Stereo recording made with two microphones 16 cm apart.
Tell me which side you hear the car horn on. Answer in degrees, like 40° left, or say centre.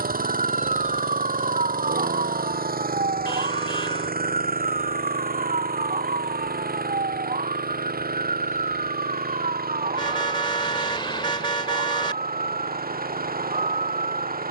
30° left.